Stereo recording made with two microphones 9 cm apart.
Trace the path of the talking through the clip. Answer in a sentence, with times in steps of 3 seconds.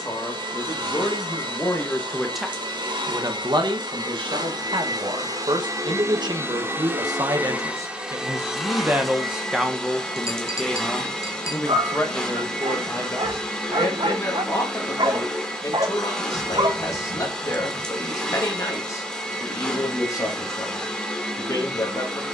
In this clip you hear the talking on the left from 0 s, on the right from 3 s, in the centre from 9 s and on the left from 12 s.